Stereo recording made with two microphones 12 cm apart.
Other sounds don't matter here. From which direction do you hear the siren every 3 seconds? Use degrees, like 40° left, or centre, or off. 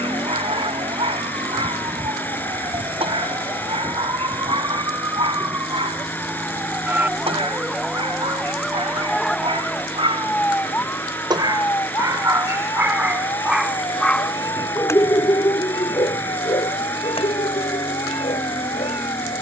50° right, 30° right, 10° right, 10° left, 30° left, 50° left, 50° left.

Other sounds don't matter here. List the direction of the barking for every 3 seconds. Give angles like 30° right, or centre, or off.
60° right, 60° right, 60° right, 50° right, 10° right, 50° left, 70° left.